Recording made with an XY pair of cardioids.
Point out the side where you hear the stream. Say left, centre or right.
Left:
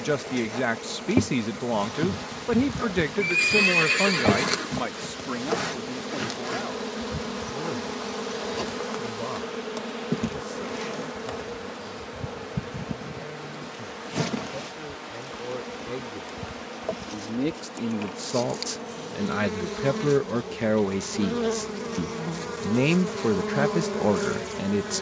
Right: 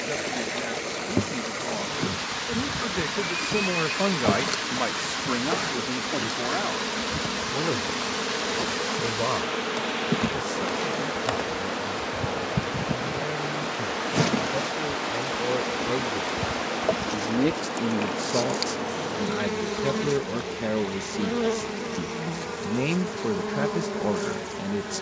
right.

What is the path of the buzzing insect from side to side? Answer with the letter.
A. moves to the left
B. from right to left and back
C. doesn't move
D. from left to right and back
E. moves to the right
D.